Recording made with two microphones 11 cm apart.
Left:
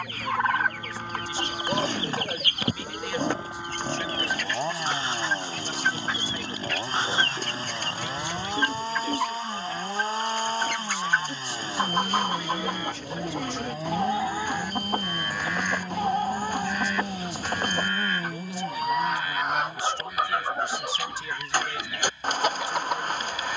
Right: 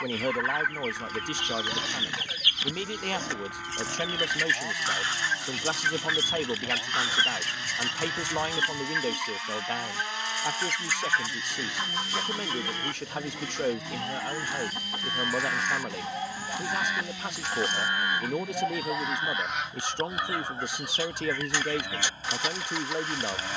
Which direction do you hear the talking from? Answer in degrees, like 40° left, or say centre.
60° right.